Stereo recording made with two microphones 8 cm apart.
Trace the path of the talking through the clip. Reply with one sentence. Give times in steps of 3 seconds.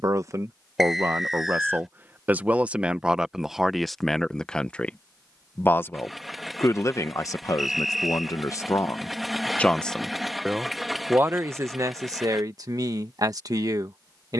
In this clip you hear the talking on the right from 0 s, in the centre from 3 s, on the left from 6 s, in the centre from 9 s and on the right from 12 s.